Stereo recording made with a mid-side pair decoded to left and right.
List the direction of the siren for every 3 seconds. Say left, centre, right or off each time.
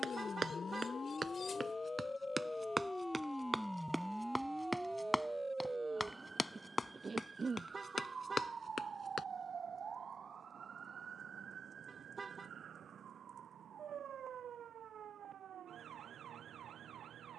left, centre, right, right, right, right.